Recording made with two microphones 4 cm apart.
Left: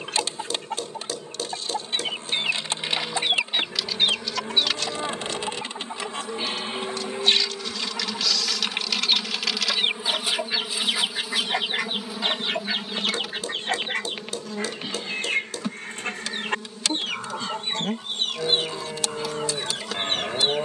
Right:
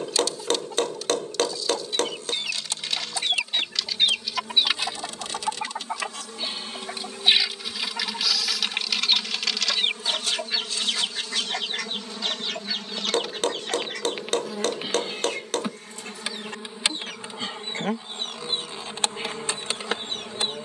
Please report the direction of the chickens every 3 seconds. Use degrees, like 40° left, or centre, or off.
40° left, 10° right, 10° right, 10° left, 40° left, 50° left, 60° left.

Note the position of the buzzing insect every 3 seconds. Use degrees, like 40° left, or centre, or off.
40° left, 40° left, 30° left, 20° left, centre, 20° right, 40° right.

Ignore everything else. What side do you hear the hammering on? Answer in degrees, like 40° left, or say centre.
70° right.